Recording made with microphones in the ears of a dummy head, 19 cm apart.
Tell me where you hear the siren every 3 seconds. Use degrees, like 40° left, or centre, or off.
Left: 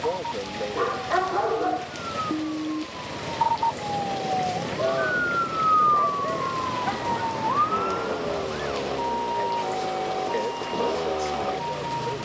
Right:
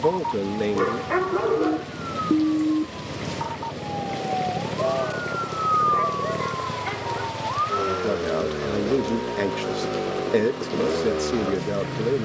50° right, centre, 50° left, 70° left.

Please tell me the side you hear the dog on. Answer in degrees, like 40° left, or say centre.
40° right.